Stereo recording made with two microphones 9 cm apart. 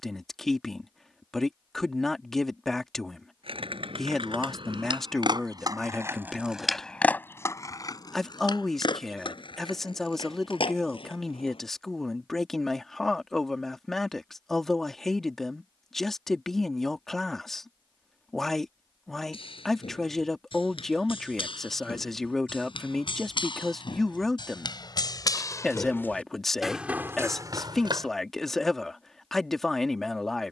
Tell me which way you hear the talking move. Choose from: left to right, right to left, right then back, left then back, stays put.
stays put.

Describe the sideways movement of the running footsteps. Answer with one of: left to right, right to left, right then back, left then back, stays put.
left to right.